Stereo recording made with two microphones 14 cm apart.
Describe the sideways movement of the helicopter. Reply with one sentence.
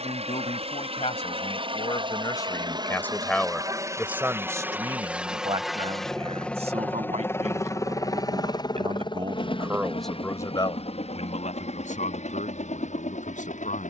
In this clip you hear the helicopter go from the right side to the left.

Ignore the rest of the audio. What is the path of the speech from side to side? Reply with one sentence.
In this clip you hear the speech move from left to right and back again.